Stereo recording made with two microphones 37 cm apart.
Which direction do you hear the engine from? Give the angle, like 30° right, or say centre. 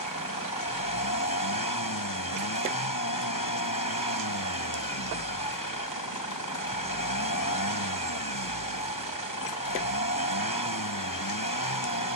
70° left.